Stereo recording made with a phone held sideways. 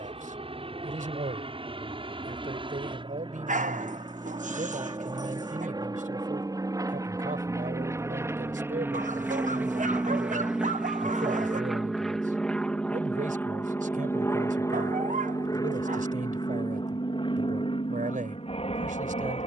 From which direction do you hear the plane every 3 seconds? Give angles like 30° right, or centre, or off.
50° right, 40° right, 20° right, 10° right, 10° left, 30° left, 40° left.